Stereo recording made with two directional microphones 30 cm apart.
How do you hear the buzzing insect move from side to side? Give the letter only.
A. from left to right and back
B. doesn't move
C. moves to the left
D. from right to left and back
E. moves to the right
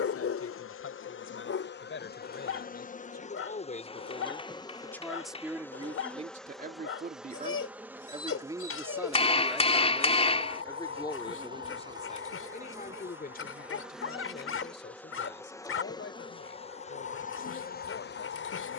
A.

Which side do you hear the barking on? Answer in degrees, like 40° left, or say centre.
50° left.